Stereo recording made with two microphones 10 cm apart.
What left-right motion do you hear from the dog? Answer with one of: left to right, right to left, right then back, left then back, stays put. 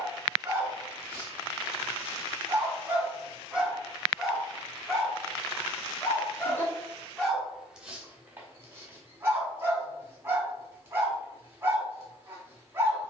left then back.